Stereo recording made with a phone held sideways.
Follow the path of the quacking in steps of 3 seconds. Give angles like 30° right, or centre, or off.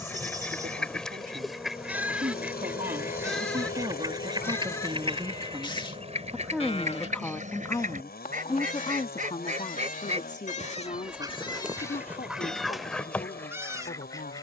centre, 30° right, 50° right, 30° right, 10° left.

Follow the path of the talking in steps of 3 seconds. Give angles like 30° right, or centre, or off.
60° right, 30° right, 20° left, 50° left, 60° left.